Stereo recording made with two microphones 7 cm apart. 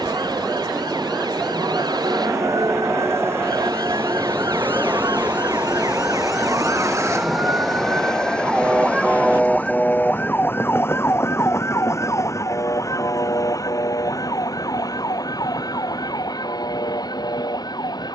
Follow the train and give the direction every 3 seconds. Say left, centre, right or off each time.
right, right, centre, left, left, left.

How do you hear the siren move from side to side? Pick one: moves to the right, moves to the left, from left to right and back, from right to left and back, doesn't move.
moves to the left.